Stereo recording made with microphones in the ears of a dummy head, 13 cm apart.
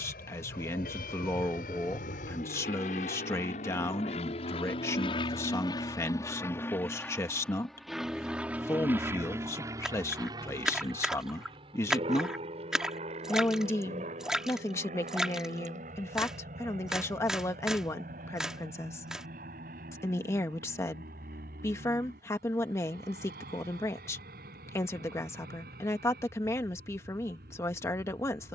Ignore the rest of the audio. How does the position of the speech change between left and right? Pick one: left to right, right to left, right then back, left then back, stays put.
stays put.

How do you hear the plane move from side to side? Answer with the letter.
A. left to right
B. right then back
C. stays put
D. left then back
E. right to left
A.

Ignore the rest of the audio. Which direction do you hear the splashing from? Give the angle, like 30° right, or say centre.
centre.